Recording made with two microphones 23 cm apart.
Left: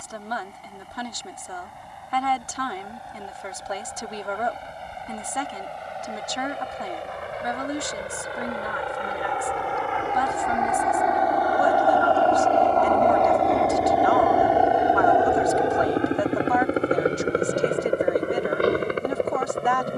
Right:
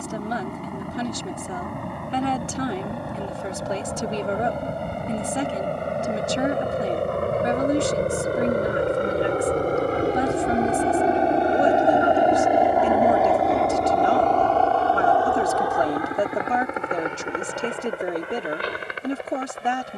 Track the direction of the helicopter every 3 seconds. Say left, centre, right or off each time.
right, right, right, right, centre, left, left.